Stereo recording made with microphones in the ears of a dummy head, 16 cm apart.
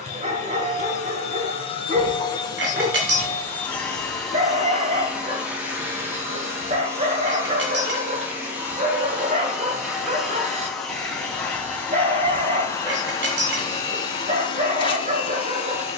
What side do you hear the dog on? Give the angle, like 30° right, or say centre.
40° right.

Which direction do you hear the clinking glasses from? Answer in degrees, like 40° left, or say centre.
70° right.